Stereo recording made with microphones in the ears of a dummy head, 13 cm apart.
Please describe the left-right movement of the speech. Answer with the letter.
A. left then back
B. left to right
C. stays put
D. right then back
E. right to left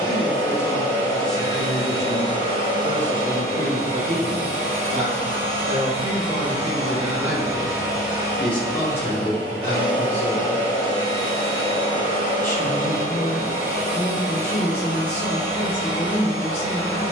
D.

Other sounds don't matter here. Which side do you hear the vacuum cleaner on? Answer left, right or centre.
right.